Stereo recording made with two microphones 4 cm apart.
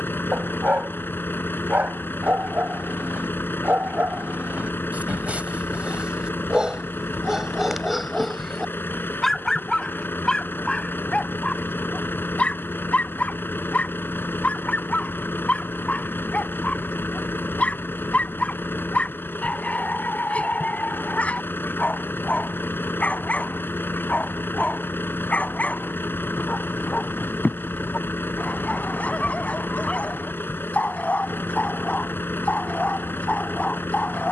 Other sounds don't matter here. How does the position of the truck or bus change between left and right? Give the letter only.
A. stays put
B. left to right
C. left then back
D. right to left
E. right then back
A.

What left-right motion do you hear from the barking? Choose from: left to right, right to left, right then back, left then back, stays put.
right to left.